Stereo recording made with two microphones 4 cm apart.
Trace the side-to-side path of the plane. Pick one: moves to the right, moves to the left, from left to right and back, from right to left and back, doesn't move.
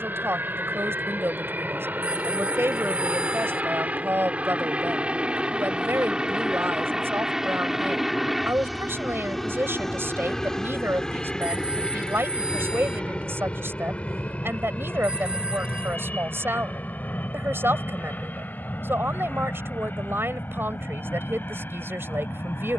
moves to the left.